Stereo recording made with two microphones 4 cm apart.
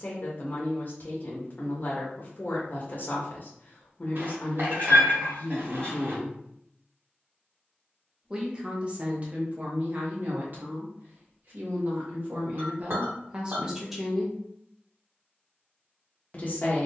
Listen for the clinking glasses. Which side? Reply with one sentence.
You can hear the clinking glasses on the right.